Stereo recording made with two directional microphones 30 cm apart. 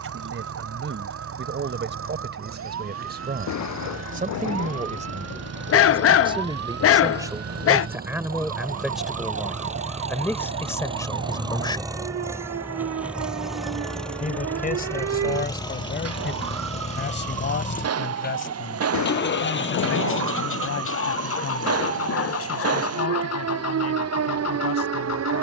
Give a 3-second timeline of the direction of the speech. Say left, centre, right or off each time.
right, right, centre, centre, left, left, left, left, left.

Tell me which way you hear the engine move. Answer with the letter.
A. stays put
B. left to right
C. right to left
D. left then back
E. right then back
C.